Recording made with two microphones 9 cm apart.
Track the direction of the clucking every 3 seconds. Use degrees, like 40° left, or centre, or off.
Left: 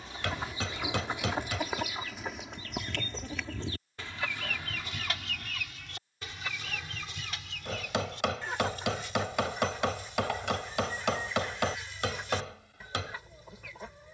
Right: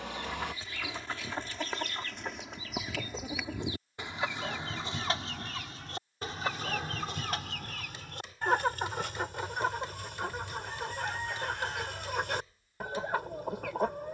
10° left, 20° right, 50° right, 60° right, 60° right.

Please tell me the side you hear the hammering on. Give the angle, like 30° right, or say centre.
80° left.